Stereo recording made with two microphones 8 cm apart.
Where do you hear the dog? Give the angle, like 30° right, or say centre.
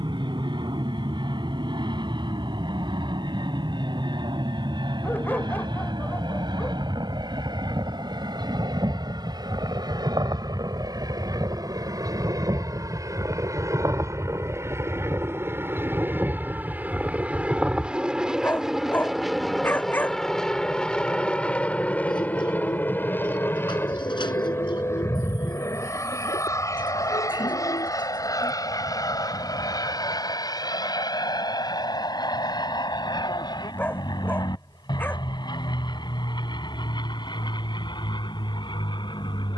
20° left.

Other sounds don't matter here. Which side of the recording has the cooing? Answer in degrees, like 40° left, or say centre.
70° left.